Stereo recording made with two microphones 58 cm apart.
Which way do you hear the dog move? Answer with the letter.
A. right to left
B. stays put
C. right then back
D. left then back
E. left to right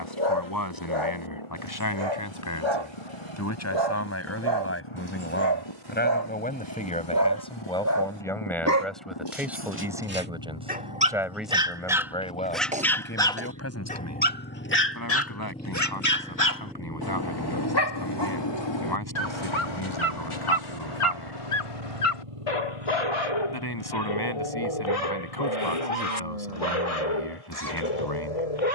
A.